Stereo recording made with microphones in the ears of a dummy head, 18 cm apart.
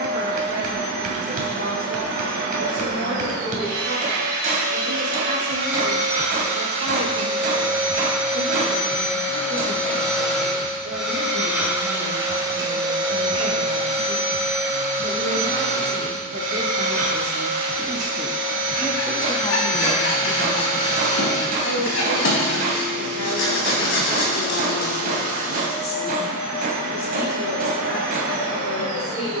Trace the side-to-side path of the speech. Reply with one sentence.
You can hear the speech move to the left.